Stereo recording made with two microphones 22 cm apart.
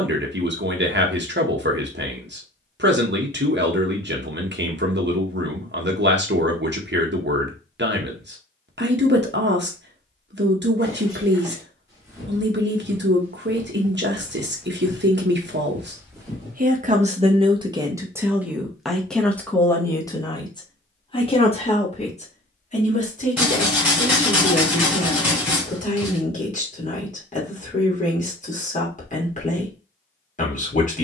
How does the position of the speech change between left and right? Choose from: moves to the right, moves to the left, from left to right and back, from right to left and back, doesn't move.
moves to the left.